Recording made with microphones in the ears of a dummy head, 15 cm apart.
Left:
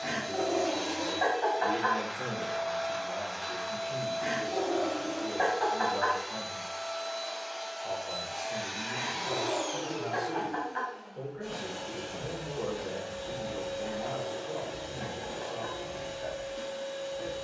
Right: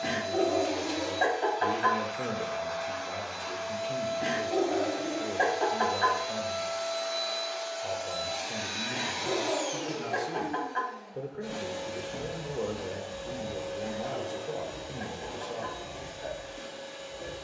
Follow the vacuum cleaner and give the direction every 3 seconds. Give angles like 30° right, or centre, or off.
20° left, centre, 50° right, 20° right, 10° left, 20° left.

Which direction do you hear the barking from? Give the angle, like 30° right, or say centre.
30° right.